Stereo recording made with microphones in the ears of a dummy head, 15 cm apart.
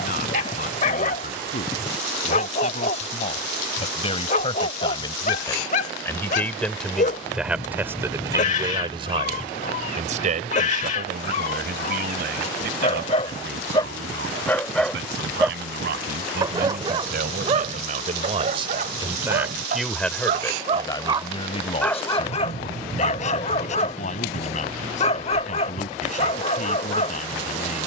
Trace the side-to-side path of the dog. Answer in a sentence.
You can hear the dog move from left to right and back again.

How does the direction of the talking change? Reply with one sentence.
You can hear the talking move from left to right and back again.